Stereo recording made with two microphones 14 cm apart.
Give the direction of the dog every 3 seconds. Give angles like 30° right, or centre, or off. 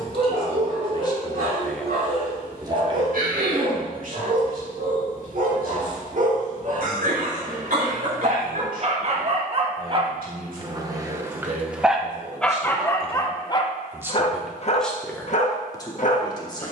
70° right, 70° right, 60° right, 30° right, 30° left, 60° left.